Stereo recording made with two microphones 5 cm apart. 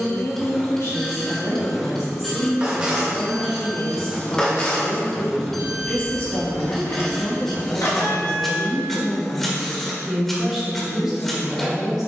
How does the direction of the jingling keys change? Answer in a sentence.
You can hear the jingling keys go from the right side to the left.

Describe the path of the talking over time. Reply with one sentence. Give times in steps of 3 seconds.
You can hear the talking on the left from 0 s and in the centre from 9 s.